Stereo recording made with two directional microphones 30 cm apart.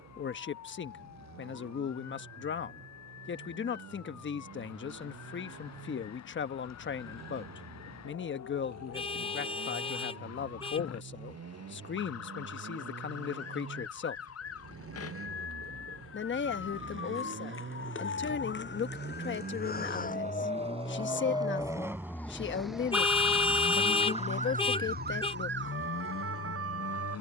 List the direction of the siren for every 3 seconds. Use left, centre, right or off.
left, left, left, left, left, left, left, centre, right.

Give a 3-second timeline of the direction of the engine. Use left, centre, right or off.
right, right, right, right, right, right, right, centre, left.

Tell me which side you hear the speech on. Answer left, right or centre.
left.